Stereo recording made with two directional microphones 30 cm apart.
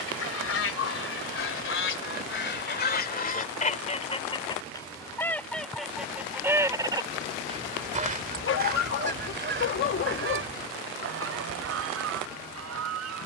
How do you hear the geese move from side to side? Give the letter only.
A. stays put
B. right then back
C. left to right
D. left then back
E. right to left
C.